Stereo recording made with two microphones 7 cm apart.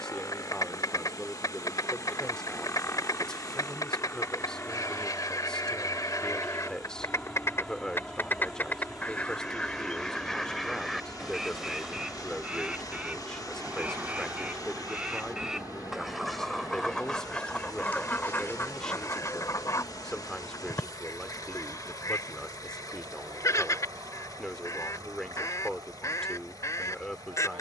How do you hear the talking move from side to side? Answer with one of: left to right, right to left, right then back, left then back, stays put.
stays put.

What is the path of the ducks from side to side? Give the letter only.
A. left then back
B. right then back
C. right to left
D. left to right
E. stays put
B.